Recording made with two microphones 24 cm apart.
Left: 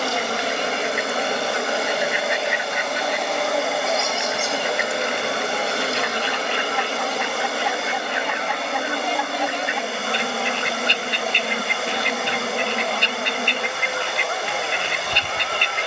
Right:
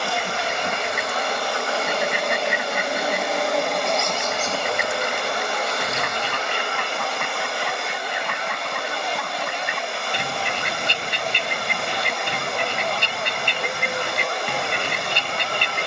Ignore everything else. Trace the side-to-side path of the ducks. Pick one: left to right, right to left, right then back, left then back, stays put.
stays put.